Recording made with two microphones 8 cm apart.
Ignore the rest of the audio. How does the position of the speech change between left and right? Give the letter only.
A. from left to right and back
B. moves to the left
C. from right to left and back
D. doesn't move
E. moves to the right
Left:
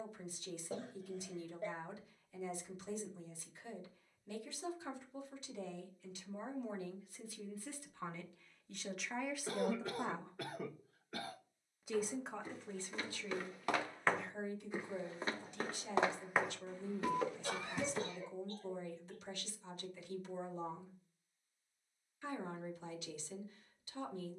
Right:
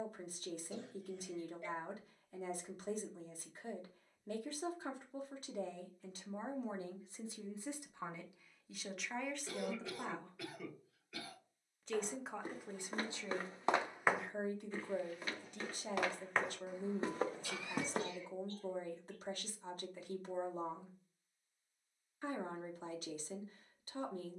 C.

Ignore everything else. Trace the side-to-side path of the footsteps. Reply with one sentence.
In this clip you hear the footsteps move from right to left and back again.